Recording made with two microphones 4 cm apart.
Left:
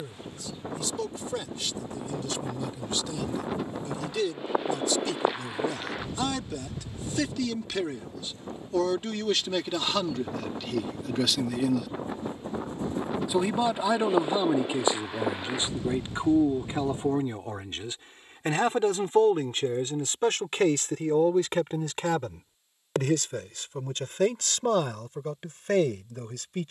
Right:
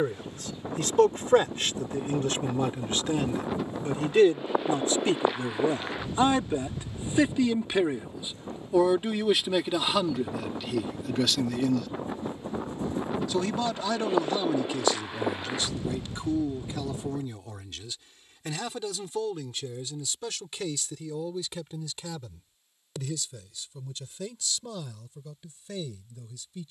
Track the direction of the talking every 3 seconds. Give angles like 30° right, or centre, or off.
50° right, 40° right, 20° right, 10° right, 20° left, 30° left, 40° left, 50° left, 60° left.